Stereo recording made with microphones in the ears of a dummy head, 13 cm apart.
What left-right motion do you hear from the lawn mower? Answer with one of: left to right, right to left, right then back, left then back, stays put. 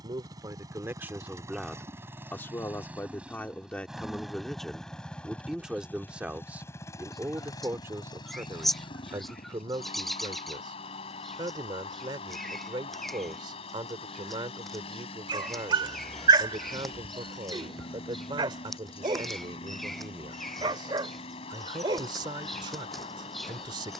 right to left.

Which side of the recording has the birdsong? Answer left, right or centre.
centre.